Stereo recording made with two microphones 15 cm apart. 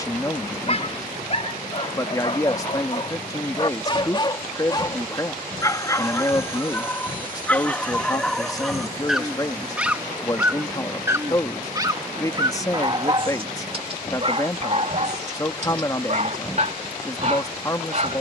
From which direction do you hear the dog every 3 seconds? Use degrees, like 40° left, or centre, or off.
40° left, 30° left, 10° left, 10° right, 40° right, 50° right.